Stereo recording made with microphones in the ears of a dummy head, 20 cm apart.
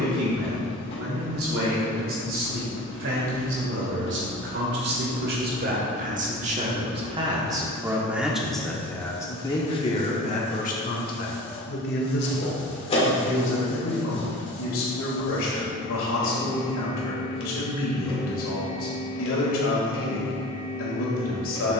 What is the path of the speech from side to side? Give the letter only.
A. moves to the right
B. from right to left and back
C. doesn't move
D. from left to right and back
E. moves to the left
E.